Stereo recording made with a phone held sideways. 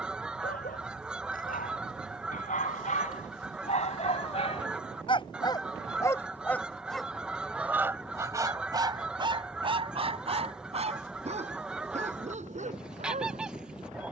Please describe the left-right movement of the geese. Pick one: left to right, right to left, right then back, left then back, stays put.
stays put.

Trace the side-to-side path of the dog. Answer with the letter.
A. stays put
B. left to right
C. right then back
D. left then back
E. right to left
B.